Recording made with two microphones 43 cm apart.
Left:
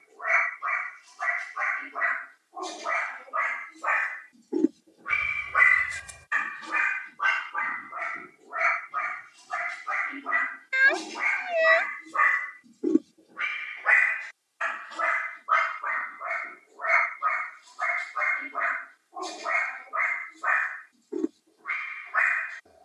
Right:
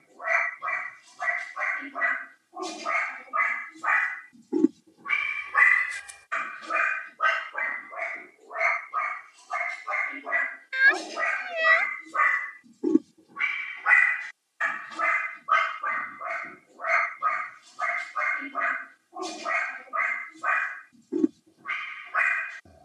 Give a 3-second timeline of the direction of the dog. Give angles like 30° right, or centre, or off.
50° right, 20° right, 20° left, 20° left, 20° right, 50° right, 50° right, 50° right.